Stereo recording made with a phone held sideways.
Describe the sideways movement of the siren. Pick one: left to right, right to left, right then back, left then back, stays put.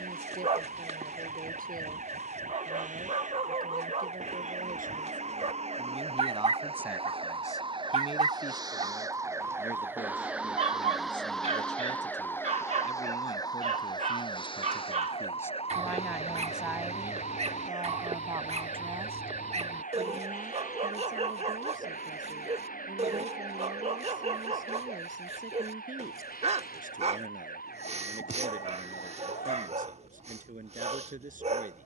right to left.